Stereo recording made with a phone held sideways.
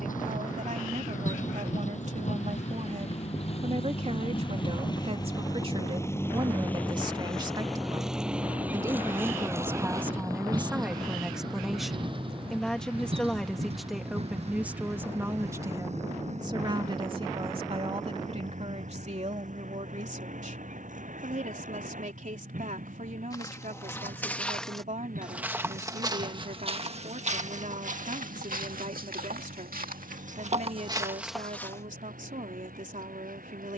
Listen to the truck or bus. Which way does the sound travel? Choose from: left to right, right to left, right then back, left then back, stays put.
left to right.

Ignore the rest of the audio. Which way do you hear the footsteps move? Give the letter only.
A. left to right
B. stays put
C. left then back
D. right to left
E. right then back
E.